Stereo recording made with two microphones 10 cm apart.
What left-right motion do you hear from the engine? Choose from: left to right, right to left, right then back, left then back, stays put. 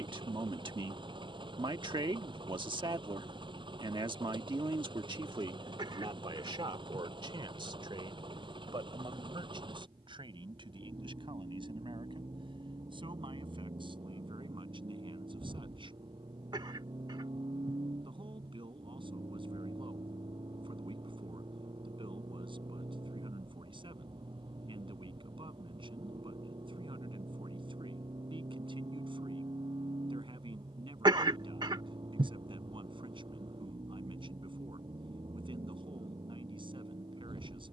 stays put.